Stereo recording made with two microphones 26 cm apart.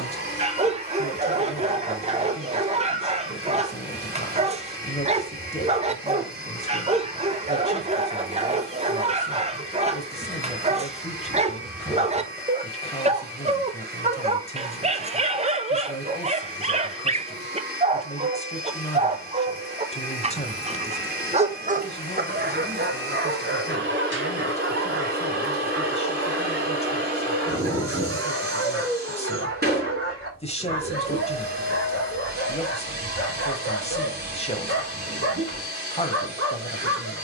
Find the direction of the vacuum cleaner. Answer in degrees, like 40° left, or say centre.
40° right.